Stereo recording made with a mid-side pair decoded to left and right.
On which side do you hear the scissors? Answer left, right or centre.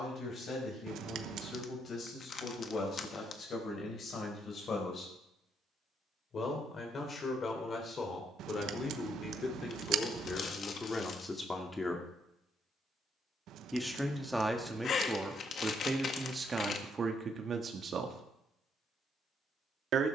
right.